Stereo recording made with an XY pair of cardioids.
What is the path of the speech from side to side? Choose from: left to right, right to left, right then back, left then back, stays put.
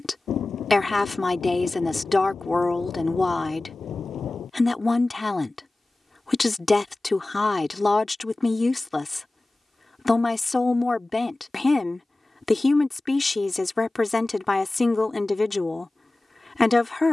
stays put.